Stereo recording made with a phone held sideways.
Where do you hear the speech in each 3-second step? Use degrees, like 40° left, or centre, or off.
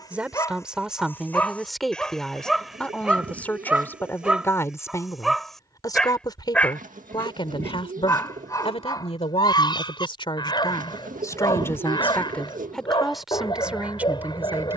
centre, 20° left, 30° left, 30° left, centre.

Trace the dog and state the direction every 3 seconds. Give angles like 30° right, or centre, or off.
10° left, centre, 20° left, 30° left, 30° left.